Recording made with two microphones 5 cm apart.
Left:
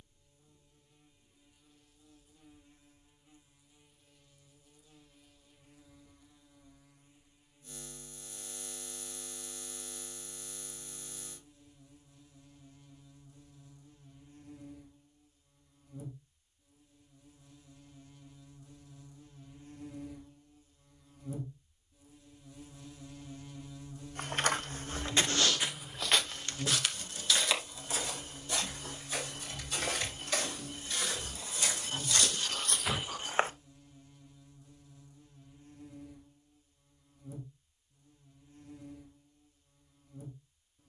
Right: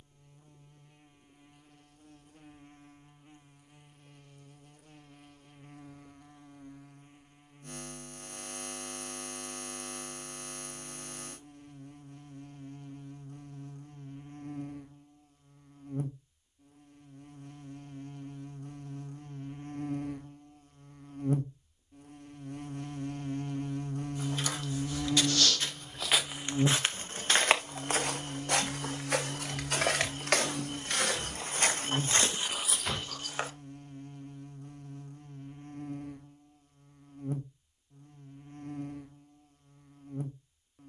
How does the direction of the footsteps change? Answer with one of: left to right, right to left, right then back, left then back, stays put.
right then back.